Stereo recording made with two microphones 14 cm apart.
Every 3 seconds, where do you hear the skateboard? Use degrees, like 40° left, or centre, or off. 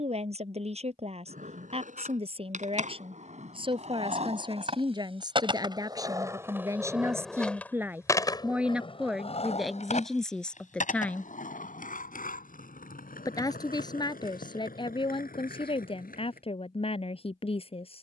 60° right, 50° right, 10° left, 60° left, 70° left, 80° left.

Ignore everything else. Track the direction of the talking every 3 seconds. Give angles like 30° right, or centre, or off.
40° right, 30° right, 20° right, centre, 30° left, 40° left.